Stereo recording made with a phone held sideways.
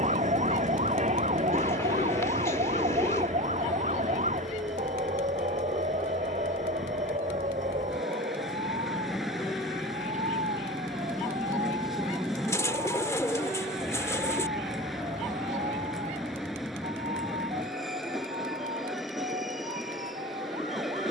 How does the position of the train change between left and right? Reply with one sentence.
You can hear the train stay in one place.